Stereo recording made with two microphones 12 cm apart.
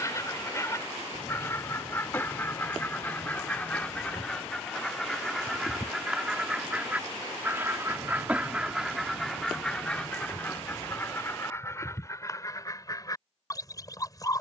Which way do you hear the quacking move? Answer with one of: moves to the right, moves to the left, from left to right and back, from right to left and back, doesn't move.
from left to right and back.